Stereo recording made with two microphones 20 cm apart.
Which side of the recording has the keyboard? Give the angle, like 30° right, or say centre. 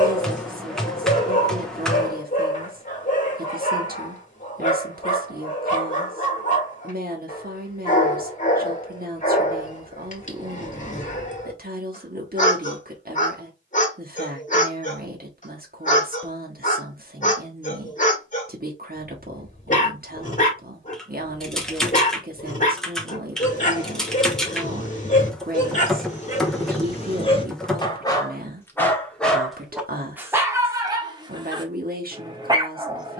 centre.